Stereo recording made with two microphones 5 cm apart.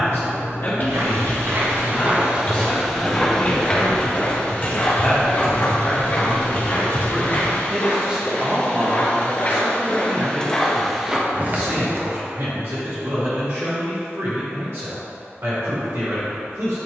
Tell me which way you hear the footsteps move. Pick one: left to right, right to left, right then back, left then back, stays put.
left then back.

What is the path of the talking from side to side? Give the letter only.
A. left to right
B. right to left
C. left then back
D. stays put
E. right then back
A.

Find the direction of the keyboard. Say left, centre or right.
left.